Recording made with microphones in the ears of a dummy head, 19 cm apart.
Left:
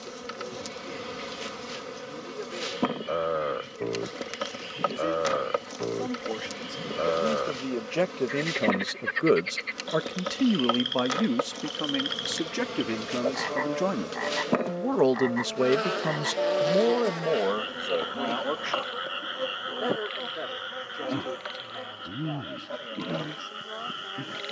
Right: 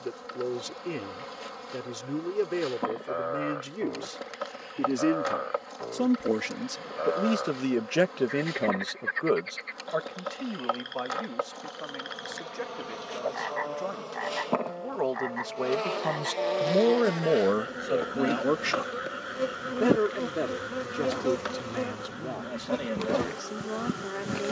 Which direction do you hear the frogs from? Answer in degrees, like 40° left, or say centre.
40° left.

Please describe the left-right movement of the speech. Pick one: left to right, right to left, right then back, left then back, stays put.
left then back.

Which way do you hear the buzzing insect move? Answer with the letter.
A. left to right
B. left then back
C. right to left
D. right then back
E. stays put
A.